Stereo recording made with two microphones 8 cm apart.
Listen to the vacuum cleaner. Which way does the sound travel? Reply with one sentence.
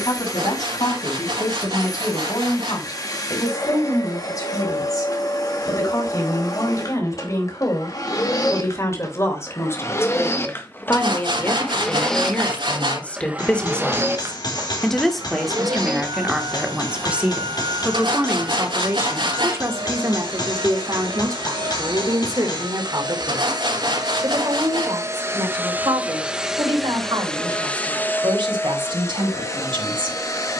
You can hear the vacuum cleaner move from left to right and back again.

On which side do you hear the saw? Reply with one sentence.
In this clip you hear the saw on the right.